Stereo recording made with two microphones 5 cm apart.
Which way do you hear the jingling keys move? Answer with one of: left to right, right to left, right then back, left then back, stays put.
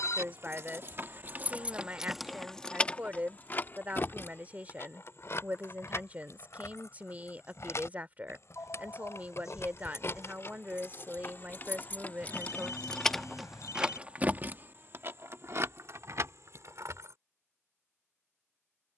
left then back.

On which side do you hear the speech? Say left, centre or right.
right.